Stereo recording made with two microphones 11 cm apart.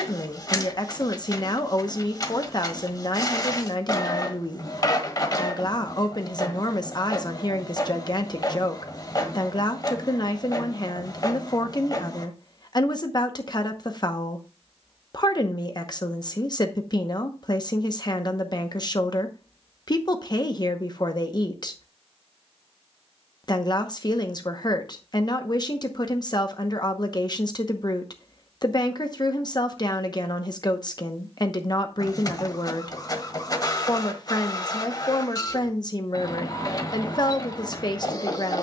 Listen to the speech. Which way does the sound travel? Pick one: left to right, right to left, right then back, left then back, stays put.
stays put.